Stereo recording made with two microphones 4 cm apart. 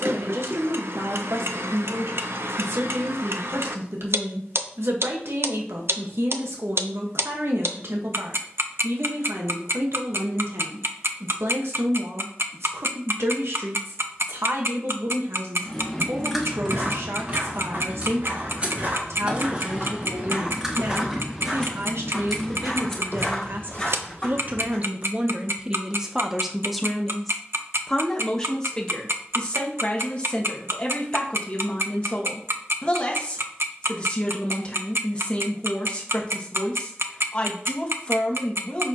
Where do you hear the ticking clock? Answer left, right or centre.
right.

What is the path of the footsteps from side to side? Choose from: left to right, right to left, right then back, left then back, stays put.
right to left.